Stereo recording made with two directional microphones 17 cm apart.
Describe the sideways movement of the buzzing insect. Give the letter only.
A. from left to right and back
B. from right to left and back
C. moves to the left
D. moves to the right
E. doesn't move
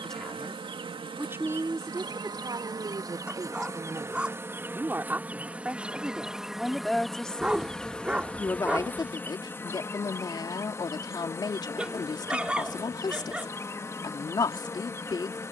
C.